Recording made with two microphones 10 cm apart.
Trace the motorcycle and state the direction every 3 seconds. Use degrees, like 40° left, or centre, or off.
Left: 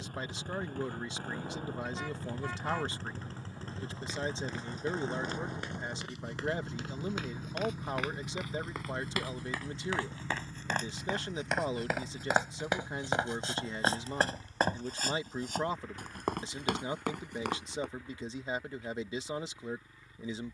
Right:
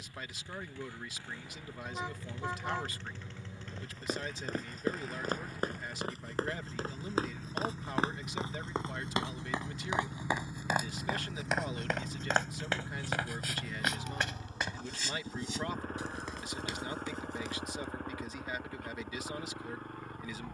50° left, 30° left, 10° left, 10° right, 30° right, 50° right, 60° right.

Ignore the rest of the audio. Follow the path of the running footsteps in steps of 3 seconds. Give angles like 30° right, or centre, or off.
off, 50° right, 40° right, 10° right, 30° left, 60° left, off.